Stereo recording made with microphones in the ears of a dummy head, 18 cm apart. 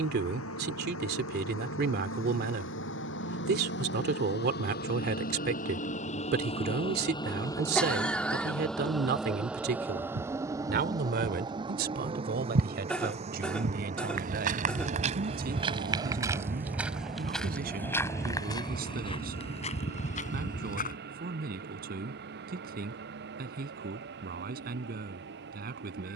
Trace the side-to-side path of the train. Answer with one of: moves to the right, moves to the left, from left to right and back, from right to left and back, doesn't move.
moves to the right.